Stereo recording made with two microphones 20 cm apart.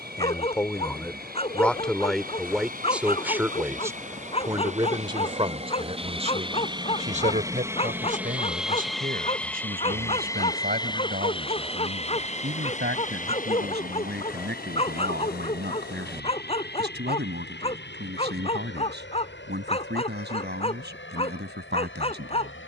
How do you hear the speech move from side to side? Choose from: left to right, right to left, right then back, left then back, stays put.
left to right.